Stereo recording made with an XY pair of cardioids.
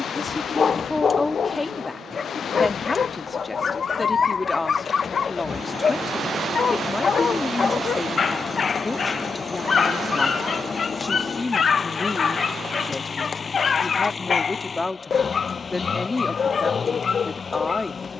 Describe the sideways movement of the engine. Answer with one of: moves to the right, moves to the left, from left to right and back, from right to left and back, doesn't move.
doesn't move.